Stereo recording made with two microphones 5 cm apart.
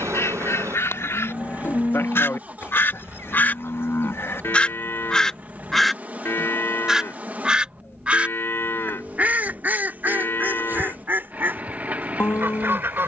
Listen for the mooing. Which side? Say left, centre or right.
left.